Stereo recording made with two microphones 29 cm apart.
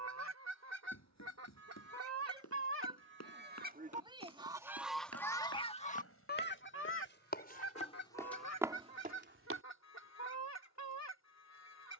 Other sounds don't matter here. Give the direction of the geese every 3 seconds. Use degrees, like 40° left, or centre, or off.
60° right, 10° right, 50° left, 60° left.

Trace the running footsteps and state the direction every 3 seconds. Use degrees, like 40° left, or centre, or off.
60° left, 60° left, 30° left, 40° right.